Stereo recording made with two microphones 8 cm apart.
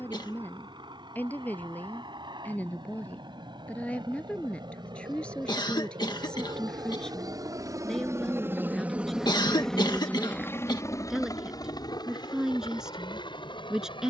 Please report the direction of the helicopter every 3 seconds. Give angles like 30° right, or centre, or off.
80° right, 70° right, 40° right, 20° left, 60° left.